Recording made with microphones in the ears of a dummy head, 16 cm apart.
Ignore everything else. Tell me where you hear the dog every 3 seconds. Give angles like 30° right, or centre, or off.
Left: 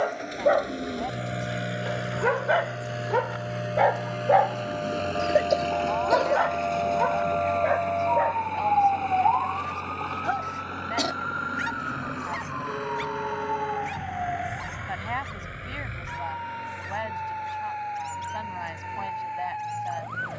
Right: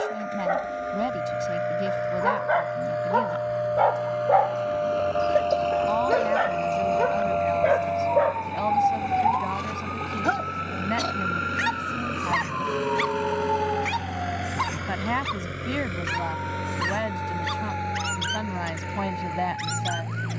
40° left, 10° left, 40° right, 60° right, 70° right, 80° right, 80° right.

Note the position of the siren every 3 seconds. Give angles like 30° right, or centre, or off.
70° right, 50° right, 30° right, 10° left, 30° left, 50° left, 50° left.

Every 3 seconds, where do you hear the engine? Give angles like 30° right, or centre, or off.
40° left, 20° left, centre, 20° right, 40° right, 50° right, 60° right.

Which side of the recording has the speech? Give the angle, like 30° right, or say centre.
60° right.